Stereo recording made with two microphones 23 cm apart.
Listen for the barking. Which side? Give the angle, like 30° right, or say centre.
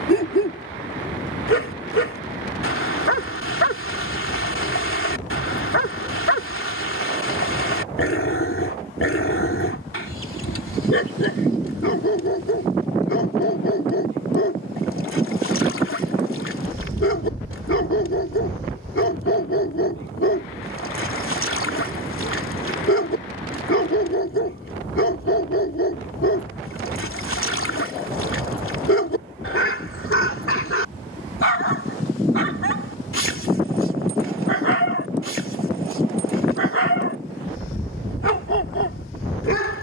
60° left.